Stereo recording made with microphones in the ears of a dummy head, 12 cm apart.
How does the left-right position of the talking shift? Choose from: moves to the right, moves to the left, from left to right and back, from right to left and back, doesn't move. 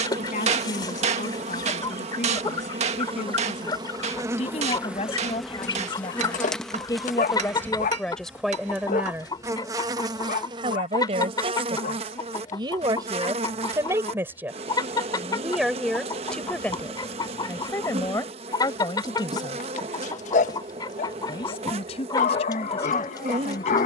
from left to right and back.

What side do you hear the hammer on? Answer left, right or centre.
right.